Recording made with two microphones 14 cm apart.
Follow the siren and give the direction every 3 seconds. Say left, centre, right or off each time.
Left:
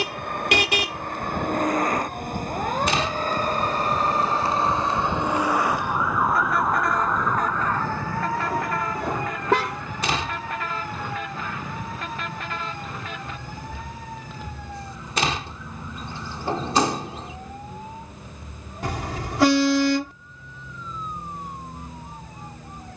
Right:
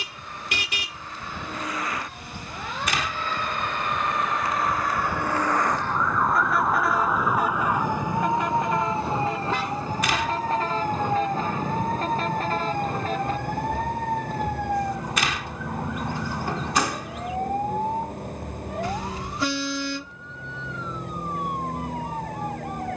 left, left, centre, right, right, right, right, right.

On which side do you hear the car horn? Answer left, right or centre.
left.